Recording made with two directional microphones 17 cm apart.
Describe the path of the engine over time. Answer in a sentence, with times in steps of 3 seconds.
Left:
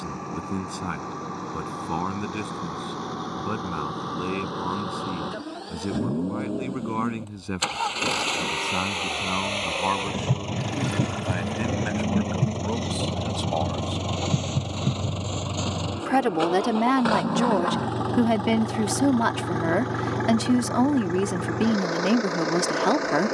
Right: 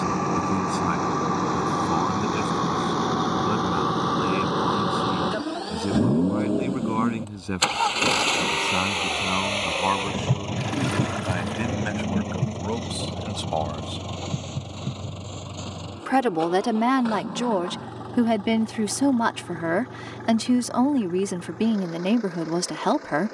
In this clip you hear the engine on the right from 0 s, in the centre from 9 s and on the left from 12 s.